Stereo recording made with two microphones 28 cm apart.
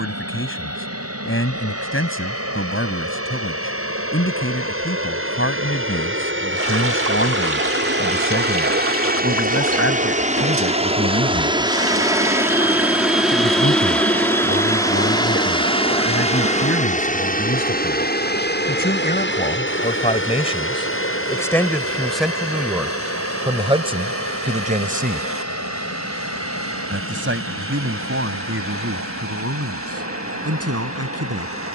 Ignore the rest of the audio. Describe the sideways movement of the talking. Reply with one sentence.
You can hear the talking go from the left side to the right.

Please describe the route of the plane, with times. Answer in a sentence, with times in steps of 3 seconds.
You can hear the plane on the right from 0 s, in the centre from 12 s and on the left from 15 s.